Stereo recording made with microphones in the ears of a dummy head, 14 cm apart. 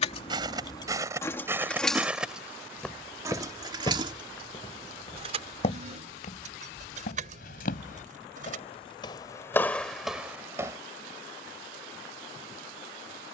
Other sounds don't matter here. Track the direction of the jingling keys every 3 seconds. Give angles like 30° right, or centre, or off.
20° left, 30° right, 50° right, off, off.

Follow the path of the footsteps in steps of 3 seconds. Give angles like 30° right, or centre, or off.
20° right, 30° left, 50° left, centre, off.